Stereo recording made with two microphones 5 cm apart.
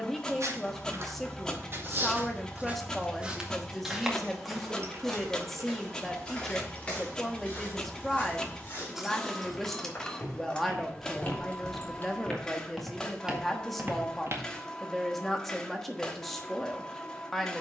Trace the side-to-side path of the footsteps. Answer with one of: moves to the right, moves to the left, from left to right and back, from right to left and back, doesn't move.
from right to left and back.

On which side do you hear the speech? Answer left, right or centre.
centre.